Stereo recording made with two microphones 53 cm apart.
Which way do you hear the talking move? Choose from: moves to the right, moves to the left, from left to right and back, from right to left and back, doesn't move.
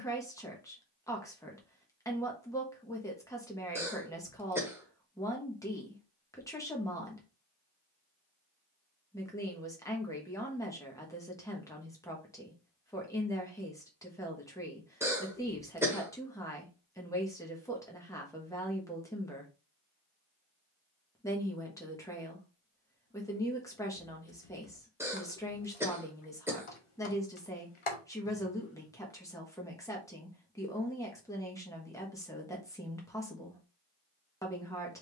doesn't move.